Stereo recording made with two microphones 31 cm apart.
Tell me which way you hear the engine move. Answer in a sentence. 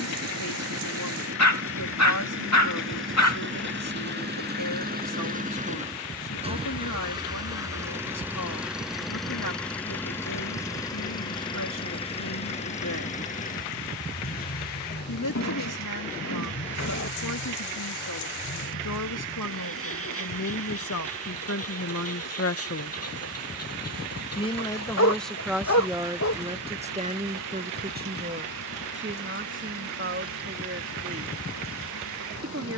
You can hear the engine move from right to left.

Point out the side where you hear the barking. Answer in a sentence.
In this clip you hear the barking on the left.